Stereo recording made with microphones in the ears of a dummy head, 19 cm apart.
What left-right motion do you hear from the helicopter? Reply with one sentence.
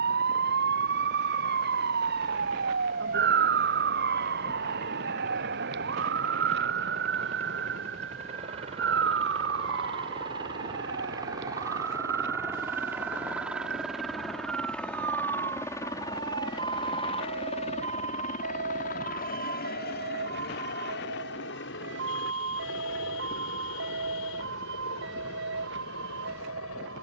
You can hear the helicopter go from the right side to the left.